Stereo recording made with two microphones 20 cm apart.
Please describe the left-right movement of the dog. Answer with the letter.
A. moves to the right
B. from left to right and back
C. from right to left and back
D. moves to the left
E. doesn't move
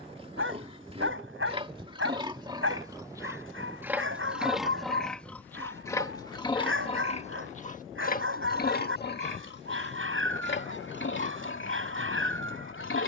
E.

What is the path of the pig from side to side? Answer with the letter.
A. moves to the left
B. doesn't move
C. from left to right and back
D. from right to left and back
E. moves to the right
A.